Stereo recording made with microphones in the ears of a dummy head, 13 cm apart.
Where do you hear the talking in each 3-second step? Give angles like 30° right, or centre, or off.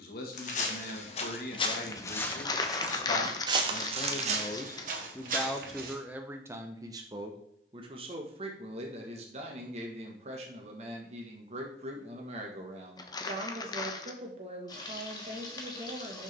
70° left, 20° left, 30° right, 50° right, 50° right, 50° right.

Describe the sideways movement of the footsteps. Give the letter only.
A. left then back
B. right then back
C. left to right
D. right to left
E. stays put
C.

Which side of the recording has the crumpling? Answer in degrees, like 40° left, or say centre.
30° left.